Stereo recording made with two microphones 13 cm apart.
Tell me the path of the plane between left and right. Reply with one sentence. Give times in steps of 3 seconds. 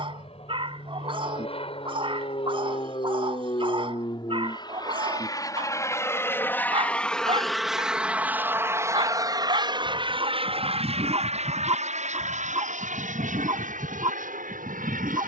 You can hear the plane on the left from 0 s, in the centre from 6 s and on the right from 9 s.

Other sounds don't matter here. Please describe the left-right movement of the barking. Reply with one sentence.
You can hear the barking stay put.